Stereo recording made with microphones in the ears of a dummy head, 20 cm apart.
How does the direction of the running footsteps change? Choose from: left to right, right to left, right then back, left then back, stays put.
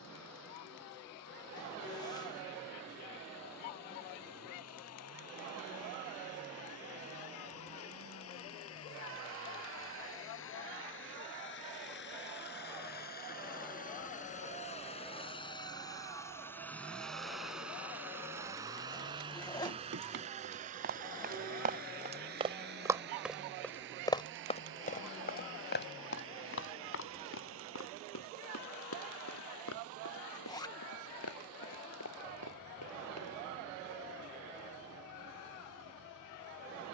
right to left.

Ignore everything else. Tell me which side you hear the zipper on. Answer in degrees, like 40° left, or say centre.
20° left.